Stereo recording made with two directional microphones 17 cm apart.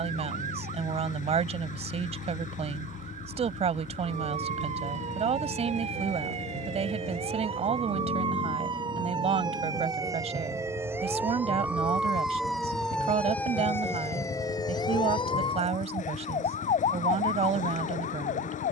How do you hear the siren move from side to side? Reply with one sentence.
You can hear the siren go from the right side to the left.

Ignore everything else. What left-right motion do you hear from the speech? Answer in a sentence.
In this clip you hear the speech stay in one place.